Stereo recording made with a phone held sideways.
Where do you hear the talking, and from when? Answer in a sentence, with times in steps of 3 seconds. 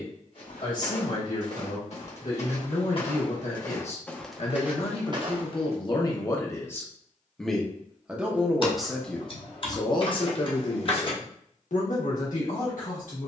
In this clip you hear the talking on the left from 0 s, in the centre from 6 s and on the left from 9 s.